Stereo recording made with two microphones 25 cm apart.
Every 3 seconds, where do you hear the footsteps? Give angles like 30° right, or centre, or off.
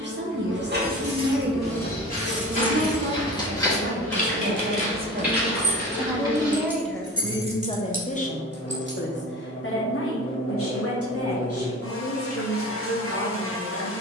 30° left, centre, 20° right, off, off.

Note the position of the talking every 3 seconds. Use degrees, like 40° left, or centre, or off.
40° right, 40° right, 10° left, 60° left, 70° left.